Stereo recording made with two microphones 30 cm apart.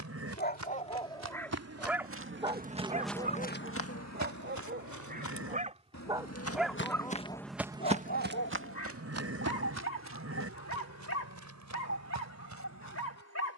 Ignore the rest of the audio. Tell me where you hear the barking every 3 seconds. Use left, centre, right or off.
centre, right, left, left, left.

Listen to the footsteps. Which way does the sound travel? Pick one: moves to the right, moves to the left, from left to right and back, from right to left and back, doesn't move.
from right to left and back.